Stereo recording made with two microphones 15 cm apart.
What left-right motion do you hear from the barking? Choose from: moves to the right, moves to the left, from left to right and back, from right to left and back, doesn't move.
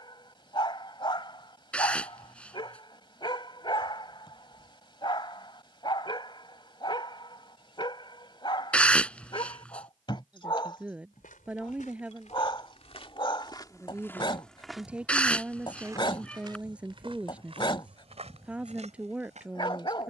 doesn't move.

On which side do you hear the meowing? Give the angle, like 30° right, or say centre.
10° left.